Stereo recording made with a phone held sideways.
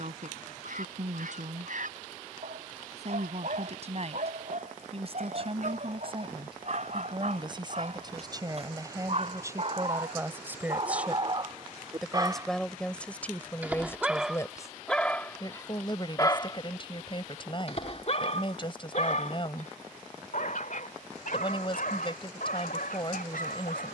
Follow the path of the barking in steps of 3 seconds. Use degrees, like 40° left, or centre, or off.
60° right, 60° right, 50° right, 40° right, 10° right, 30° left, 60° left, 70° left.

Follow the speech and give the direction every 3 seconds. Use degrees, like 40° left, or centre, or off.
60° right, 50° right, 30° right, 20° right, 10° left, 30° left, 30° left, 30° left.